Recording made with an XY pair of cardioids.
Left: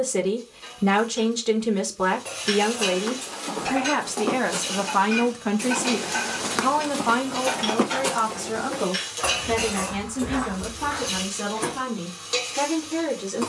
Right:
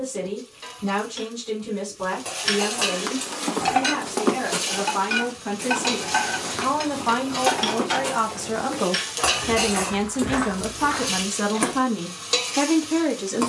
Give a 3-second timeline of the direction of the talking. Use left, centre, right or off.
left, left, centre, right, right.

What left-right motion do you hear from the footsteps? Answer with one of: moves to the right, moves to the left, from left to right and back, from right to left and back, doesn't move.
from right to left and back.